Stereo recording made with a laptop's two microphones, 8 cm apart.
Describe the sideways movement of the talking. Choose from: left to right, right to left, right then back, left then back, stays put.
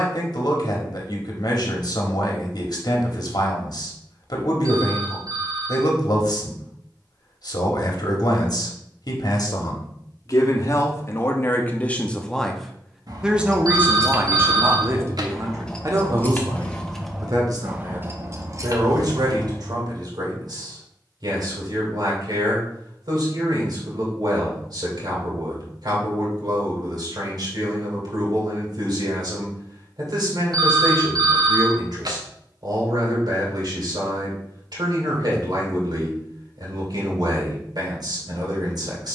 left to right.